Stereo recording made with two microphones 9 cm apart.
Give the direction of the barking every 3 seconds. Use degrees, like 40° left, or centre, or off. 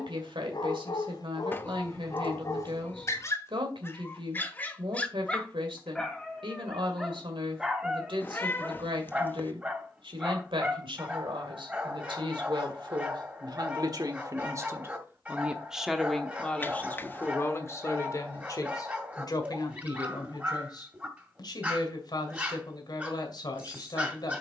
50° left, 20° left, 10° right, 20° right, 20° right, 20° right, 20° right, 20° right.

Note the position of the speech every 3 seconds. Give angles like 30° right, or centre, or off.
70° right, 70° right, 70° right, 70° right, 50° right, 10° left, 50° left, 50° left.